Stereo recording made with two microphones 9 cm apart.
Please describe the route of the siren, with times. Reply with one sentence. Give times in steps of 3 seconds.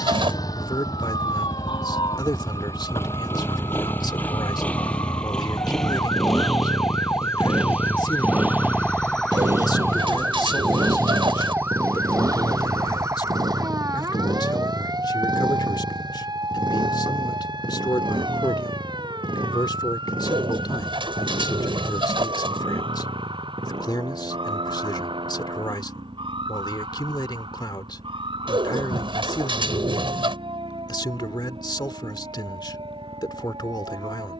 In this clip you hear the siren on the left from 0 s, in the centre from 9 s and on the right from 12 s.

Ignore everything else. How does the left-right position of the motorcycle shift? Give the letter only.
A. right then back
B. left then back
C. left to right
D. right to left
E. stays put
C.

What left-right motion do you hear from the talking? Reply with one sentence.
In this clip you hear the talking stay put.